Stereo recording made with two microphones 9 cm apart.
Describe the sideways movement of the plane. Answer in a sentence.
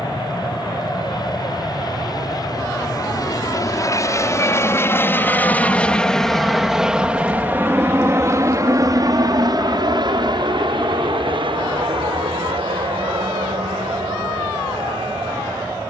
You can hear the plane move from left to right.